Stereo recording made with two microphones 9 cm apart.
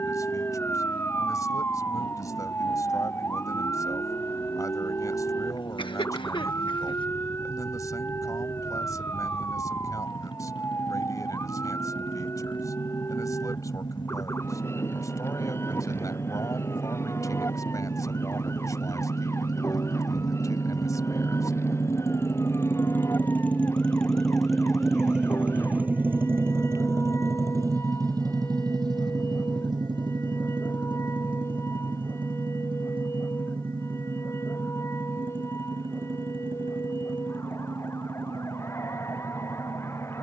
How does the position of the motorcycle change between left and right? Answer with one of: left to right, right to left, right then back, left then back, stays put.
left to right.